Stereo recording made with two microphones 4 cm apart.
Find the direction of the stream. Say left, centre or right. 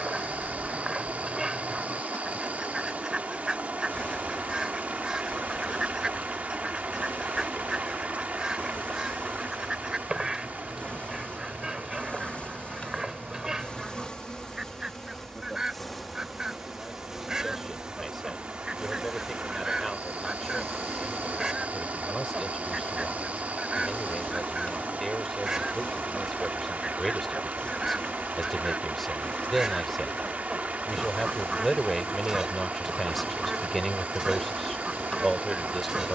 right.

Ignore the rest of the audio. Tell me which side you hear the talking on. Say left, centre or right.
centre.